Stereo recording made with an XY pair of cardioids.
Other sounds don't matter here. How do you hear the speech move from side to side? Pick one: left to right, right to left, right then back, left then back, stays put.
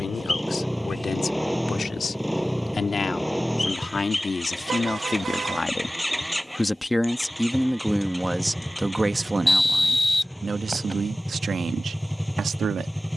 left to right.